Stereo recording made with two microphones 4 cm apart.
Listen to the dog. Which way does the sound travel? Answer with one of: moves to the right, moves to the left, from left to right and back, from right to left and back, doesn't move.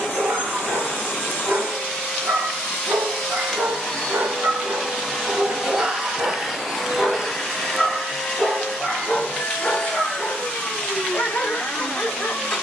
moves to the left.